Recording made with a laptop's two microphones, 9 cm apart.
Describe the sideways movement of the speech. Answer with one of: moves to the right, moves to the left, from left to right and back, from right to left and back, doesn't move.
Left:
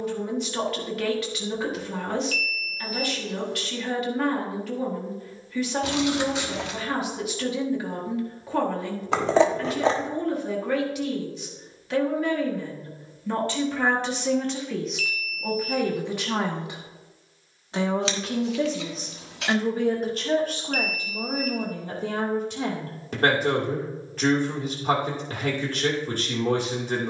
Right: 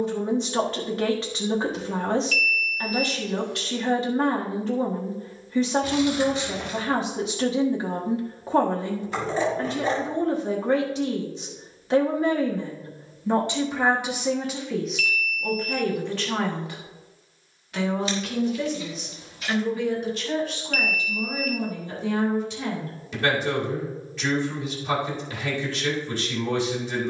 moves to the left.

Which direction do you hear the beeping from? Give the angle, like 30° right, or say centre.
40° left.